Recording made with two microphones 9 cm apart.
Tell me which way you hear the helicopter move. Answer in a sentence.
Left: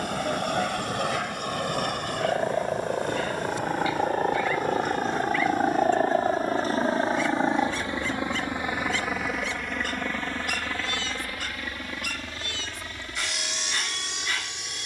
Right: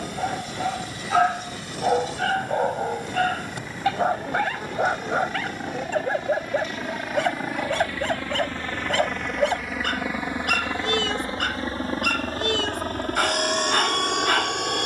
You can hear the helicopter move from left to right.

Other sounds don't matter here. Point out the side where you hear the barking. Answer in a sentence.
In this clip you hear the barking on the right.